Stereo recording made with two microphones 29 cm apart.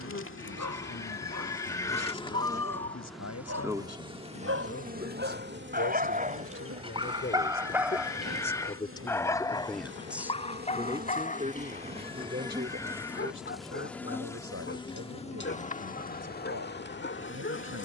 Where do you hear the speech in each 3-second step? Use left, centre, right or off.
left, left, left, centre, right, right.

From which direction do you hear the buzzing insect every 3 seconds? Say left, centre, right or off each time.
left, right, right, right, centre, left.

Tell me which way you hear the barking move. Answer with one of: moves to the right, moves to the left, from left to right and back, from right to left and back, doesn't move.
moves to the left.